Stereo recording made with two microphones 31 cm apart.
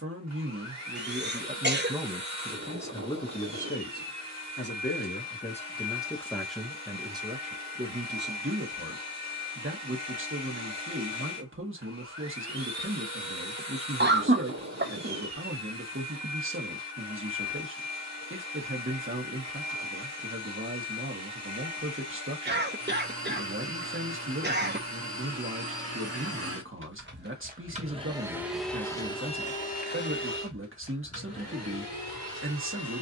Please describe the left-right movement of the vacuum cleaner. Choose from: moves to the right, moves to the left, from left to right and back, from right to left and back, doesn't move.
moves to the left.